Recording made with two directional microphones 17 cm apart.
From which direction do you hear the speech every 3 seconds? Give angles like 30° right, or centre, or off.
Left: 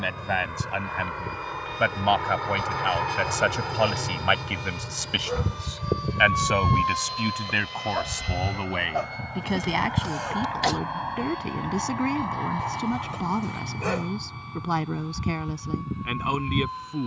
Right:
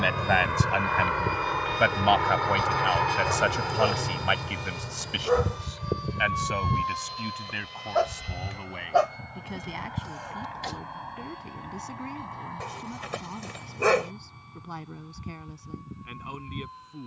10° right, 20° left, 50° left, 60° left, 70° left, 70° left.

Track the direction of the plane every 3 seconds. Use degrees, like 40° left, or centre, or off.
30° right, centre, 30° left, 40° left, 50° left, 60° left.